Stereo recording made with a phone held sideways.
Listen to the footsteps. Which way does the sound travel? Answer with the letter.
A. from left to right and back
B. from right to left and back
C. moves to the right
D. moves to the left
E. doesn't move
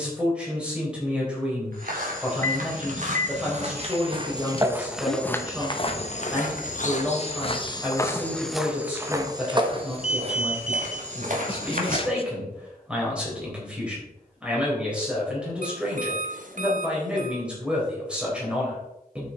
B.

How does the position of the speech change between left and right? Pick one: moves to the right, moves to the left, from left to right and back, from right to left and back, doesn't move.
doesn't move.